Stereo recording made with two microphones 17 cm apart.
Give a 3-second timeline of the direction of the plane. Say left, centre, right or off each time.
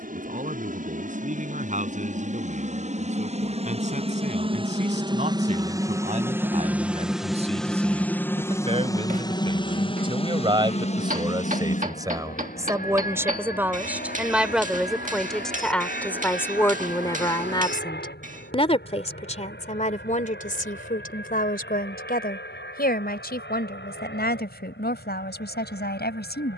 right, right, centre, left, left, left, left, left, left.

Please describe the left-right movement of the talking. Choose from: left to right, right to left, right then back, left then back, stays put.
right to left.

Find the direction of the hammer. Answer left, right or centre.
right.